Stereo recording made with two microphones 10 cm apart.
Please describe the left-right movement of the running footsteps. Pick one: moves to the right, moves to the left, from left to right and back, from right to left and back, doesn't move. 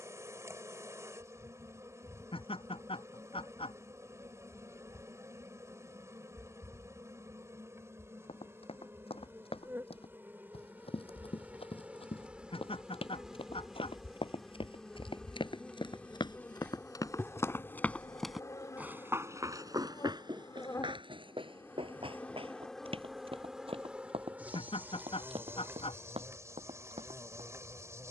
moves to the right.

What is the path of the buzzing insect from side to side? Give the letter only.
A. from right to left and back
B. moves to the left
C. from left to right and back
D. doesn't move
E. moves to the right
A.